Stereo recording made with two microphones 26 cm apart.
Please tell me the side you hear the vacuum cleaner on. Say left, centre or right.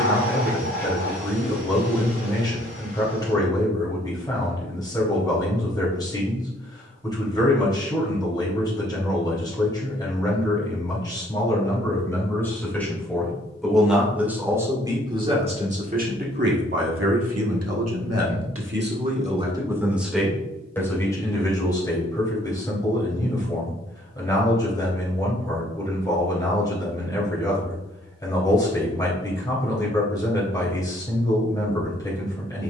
right.